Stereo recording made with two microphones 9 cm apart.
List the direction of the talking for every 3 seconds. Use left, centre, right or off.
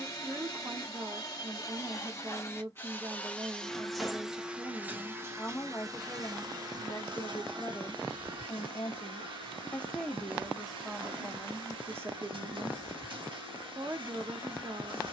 right, centre, left, centre, right.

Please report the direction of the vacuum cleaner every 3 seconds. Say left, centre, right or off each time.
left, centre, right, right, right.